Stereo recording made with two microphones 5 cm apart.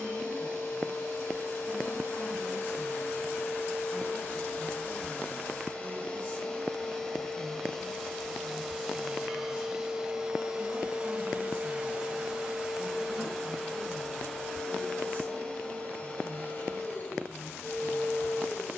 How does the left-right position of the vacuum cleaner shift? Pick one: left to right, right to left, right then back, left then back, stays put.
right then back.